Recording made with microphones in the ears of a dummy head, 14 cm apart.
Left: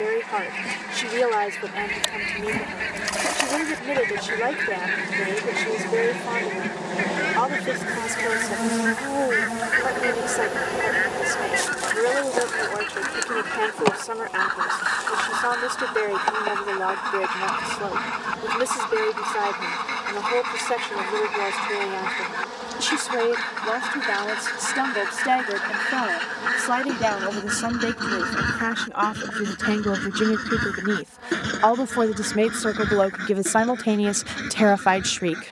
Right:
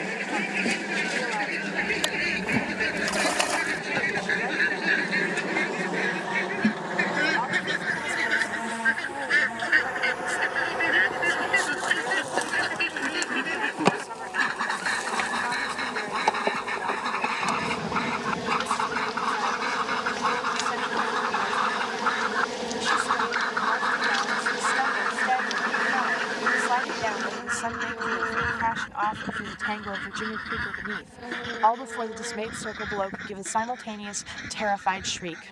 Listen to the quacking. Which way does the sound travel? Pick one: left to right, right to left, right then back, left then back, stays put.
right to left.